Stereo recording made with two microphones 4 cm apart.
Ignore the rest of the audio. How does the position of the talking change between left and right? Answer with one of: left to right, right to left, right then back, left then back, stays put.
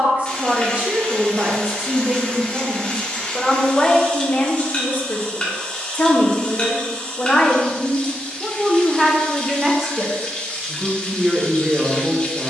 left then back.